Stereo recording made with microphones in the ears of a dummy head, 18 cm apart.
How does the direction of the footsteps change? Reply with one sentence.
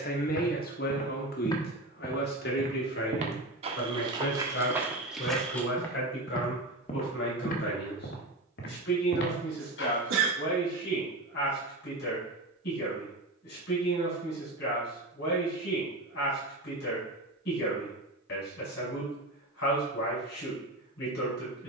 You can hear the footsteps move from left to right and back again.